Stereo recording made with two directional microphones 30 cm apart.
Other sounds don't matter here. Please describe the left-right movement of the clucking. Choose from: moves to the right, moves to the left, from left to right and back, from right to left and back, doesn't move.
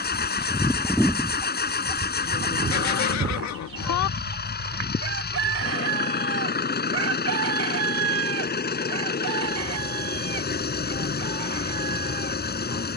moves to the right.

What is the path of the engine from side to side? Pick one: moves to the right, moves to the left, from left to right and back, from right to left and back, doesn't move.
doesn't move.